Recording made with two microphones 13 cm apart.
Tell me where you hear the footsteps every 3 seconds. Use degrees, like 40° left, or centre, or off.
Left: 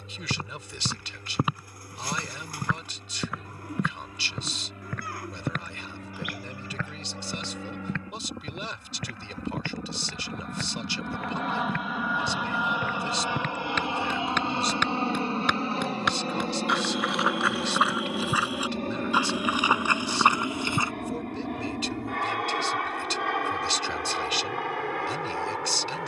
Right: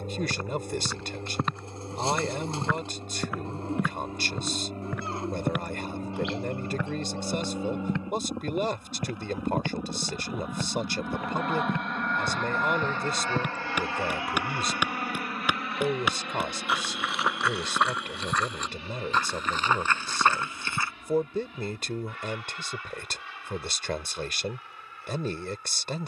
10° left, 10° right, 20° right, 20° right, 10° right, centre, 10° left, off, off.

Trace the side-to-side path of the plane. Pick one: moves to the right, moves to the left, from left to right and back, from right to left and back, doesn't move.
moves to the left.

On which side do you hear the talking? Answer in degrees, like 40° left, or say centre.
50° right.